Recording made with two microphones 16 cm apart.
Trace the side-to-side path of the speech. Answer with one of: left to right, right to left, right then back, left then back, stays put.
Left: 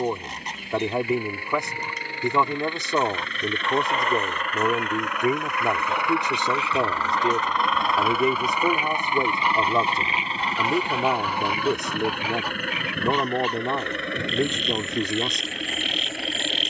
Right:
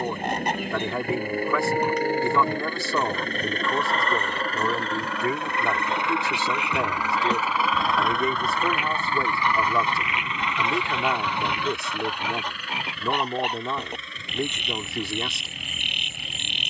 stays put.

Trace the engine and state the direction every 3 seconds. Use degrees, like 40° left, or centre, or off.
50° right, 40° right, 10° right, 30° left, 60° left, 70° left.